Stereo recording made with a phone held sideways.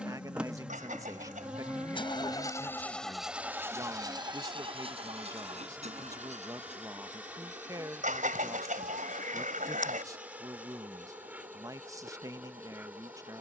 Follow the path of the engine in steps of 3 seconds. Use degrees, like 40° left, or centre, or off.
50° left, 30° right, 60° right, 70° right, 80° right.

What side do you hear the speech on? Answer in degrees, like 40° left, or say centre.
20° right.